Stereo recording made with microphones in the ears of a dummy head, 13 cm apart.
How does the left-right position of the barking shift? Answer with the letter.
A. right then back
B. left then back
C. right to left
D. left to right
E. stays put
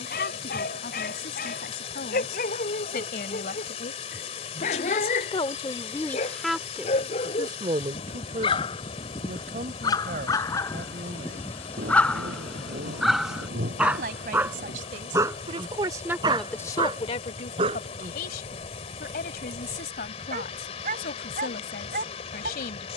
D.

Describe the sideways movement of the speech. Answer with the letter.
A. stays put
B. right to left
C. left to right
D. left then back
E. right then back
E.